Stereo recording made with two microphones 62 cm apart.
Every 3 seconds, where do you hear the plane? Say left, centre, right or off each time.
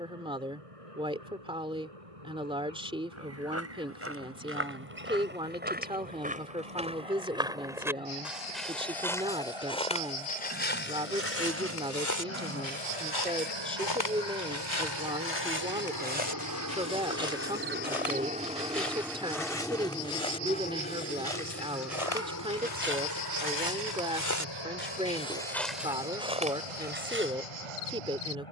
right, right, right, right, right, right, centre, left, left, left.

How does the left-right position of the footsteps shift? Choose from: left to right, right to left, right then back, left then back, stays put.
left then back.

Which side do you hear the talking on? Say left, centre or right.
centre.